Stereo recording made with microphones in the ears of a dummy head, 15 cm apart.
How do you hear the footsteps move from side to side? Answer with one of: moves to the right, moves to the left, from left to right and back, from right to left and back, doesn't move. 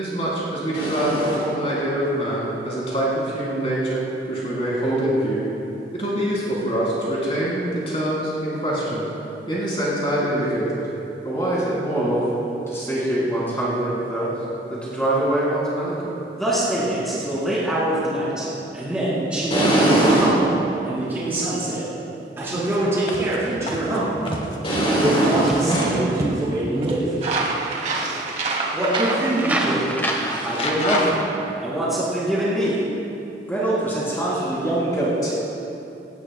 from left to right and back.